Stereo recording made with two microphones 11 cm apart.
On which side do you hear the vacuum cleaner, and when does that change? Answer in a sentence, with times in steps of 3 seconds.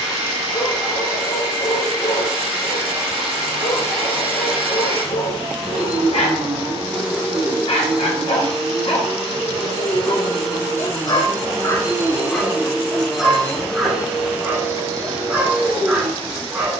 In this clip you hear the vacuum cleaner on the right from 0 s, in the centre from 12 s and on the right from 15 s.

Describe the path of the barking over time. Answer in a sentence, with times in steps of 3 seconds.
In this clip you hear the barking on the left from 0 s and in the centre from 12 s.